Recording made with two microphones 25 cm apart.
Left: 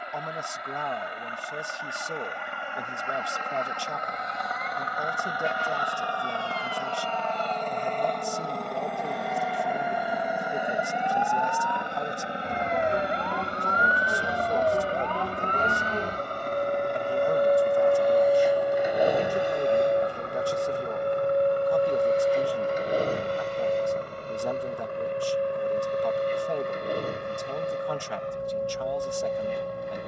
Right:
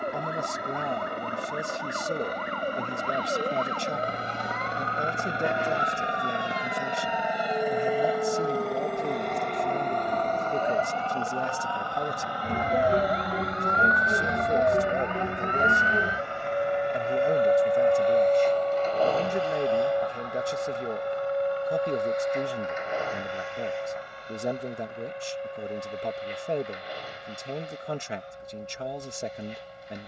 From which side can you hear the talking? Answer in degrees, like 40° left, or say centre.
20° right.